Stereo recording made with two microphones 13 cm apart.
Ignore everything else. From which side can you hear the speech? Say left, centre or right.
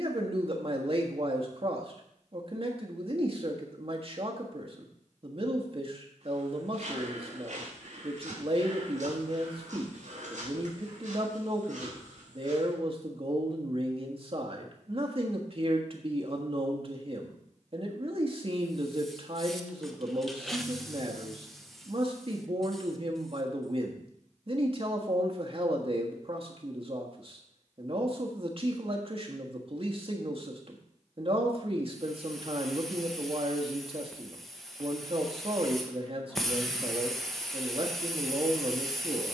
right.